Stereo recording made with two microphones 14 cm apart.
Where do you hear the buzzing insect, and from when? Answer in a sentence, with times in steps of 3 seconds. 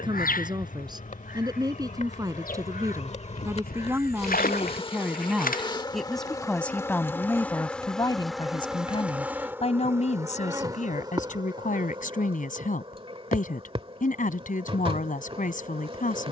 In this clip you hear the buzzing insect on the left from 0 s, in the centre from 6 s and on the right from 9 s.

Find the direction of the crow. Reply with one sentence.
You can hear the crow on the left.